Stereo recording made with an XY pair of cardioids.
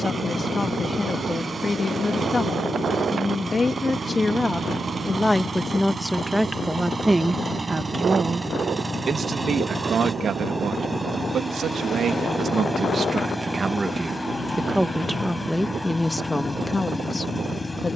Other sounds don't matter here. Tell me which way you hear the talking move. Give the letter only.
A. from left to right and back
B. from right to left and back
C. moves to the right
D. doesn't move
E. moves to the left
A.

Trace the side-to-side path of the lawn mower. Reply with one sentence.
In this clip you hear the lawn mower travel towards the left.